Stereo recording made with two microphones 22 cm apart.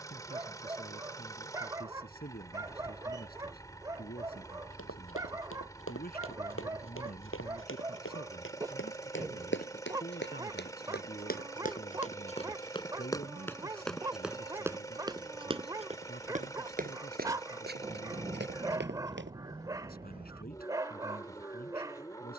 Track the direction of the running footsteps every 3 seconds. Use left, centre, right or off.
off, left, left, left, centre, right, right, off.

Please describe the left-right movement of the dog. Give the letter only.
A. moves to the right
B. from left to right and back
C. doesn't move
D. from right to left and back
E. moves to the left
C.